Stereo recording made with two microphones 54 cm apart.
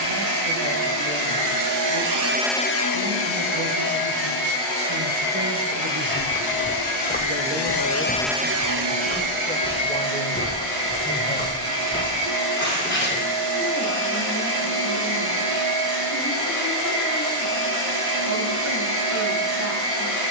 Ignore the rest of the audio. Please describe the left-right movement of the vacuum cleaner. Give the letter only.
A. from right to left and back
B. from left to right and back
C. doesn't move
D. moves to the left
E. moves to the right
A.